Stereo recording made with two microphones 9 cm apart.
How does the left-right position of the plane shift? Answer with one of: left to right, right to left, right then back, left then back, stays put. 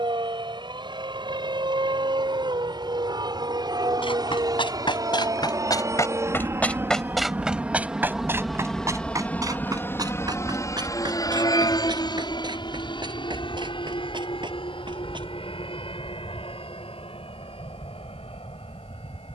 right to left.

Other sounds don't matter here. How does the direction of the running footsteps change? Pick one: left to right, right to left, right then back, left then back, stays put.
left to right.